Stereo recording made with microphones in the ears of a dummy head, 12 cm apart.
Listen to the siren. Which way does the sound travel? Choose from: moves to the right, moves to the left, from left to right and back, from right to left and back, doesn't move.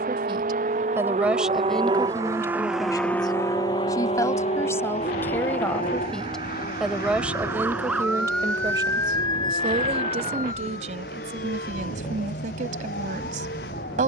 moves to the left.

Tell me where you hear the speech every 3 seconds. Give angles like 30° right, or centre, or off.
centre, 20° left, 10° right, 50° right, 60° right.